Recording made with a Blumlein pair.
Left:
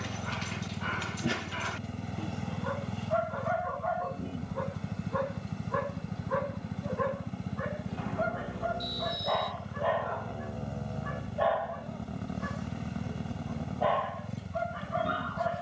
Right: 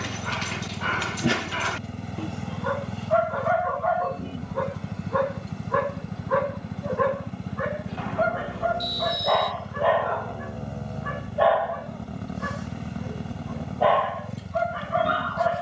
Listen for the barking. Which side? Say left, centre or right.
right.